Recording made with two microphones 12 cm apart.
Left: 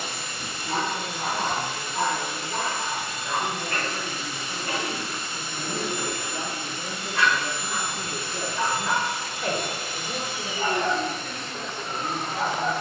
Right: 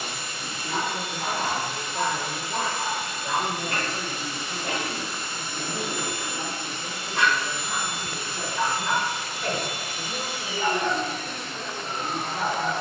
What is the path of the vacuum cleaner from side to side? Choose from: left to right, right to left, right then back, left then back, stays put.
stays put.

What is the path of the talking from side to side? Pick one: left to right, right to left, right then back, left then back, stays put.
right to left.